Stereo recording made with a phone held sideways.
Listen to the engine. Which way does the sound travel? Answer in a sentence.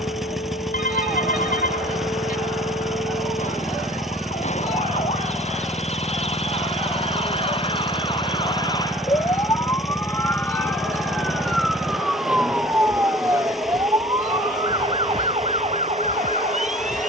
In this clip you hear the engine stay in one place.